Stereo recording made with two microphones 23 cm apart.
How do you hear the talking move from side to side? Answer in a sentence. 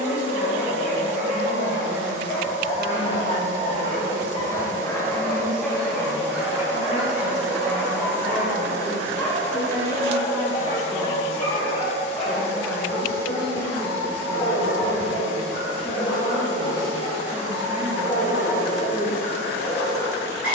In this clip you hear the talking go right and come back.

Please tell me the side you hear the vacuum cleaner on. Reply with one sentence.
In this clip you hear the vacuum cleaner on the left.